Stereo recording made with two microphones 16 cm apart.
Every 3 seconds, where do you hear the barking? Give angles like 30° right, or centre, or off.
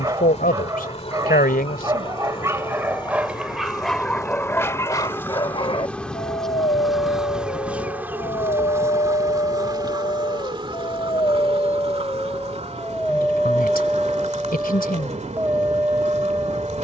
20° right, 10° left, 50° left, 40° left, centre, 10° right.